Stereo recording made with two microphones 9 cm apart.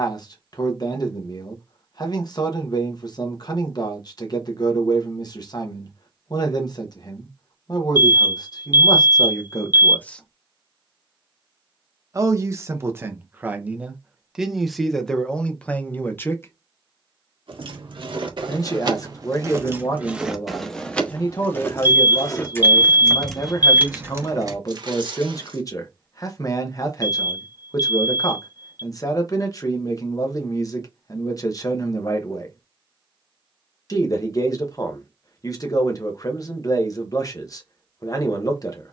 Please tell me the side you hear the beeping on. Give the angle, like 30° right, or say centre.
50° left.